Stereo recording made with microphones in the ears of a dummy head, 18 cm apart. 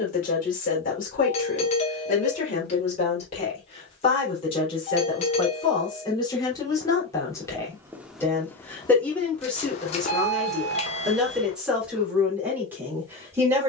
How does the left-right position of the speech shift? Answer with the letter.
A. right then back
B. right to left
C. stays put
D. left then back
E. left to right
E.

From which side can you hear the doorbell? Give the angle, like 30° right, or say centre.
30° left.